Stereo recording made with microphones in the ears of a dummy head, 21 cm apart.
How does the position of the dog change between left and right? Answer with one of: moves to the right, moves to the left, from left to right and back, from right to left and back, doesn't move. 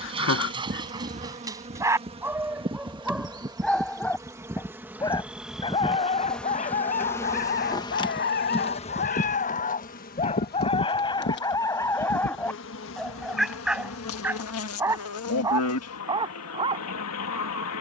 from right to left and back.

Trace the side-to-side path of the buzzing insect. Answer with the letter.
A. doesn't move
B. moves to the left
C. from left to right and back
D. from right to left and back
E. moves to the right
B.